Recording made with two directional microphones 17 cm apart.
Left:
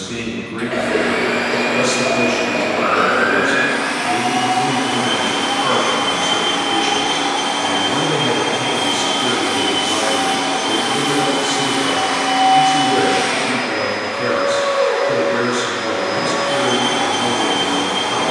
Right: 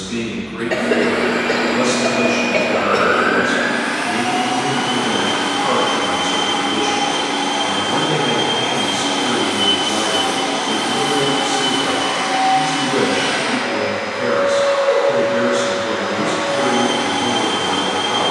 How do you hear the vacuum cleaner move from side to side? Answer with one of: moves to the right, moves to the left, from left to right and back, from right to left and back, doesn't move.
doesn't move.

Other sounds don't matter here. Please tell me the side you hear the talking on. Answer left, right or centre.
left.